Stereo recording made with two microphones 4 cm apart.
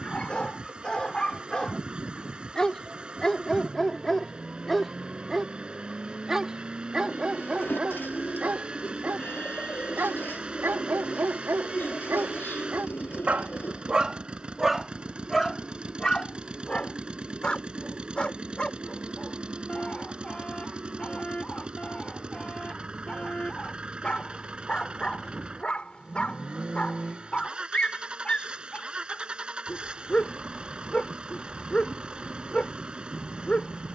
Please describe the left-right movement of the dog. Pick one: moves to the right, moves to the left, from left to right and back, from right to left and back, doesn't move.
from left to right and back.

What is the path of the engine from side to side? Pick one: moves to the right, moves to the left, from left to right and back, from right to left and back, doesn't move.
doesn't move.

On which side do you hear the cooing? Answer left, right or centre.
left.